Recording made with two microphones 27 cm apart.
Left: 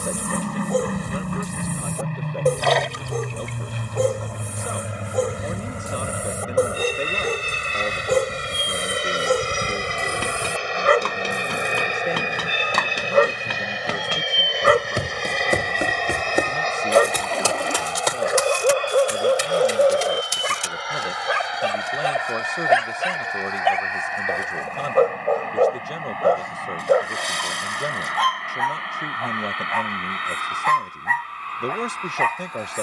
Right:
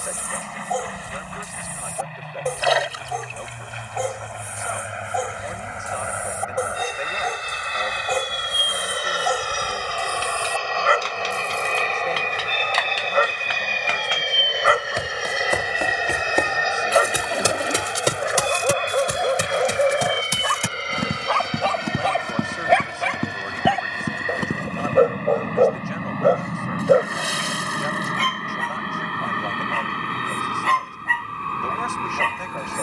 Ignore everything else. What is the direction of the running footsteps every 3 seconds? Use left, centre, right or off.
off, off, off, left, left, centre, right, right, right, off, off.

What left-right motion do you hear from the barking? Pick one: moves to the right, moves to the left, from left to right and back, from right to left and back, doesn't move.
moves to the right.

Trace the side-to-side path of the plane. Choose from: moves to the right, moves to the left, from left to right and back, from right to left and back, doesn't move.
moves to the right.